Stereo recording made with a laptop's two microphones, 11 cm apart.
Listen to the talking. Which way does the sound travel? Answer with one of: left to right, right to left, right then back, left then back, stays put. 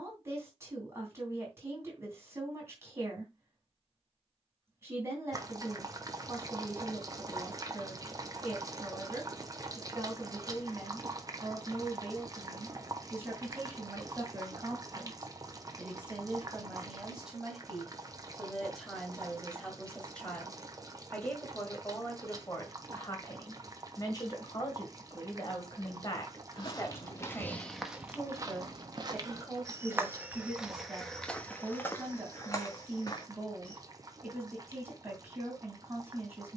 left then back.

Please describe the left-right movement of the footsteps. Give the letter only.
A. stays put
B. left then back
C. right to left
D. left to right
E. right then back
E.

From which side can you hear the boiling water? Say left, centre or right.
right.